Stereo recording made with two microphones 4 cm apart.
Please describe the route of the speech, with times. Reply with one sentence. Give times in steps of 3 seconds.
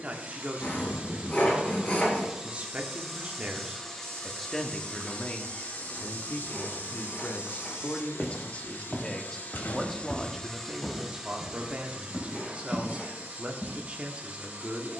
In this clip you hear the speech on the right from 0 s, in the centre from 3 s, on the left from 6 s, in the centre from 9 s and on the right from 12 s.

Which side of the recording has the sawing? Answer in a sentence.
In this clip you hear the sawing on the left.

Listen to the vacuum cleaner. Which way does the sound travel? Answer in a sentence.
In this clip you hear the vacuum cleaner move from right to left and back again.